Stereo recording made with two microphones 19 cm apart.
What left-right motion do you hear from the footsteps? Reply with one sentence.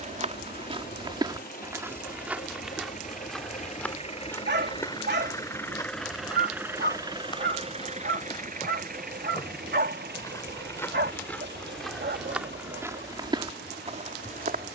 In this clip you hear the footsteps move from right to left and back again.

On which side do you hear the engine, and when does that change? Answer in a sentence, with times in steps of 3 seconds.
In this clip you hear the engine on the left from 0 s and on the right from 6 s.